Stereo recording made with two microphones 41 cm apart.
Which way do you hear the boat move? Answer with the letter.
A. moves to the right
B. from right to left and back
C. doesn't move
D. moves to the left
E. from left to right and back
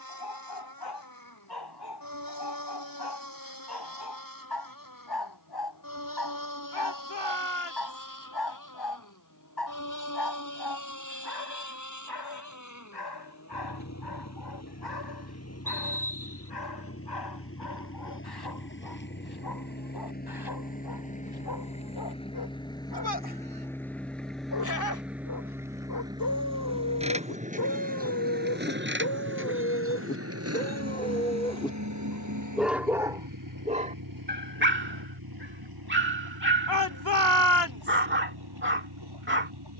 A.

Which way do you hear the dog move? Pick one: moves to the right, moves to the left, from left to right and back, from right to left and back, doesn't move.
moves to the right.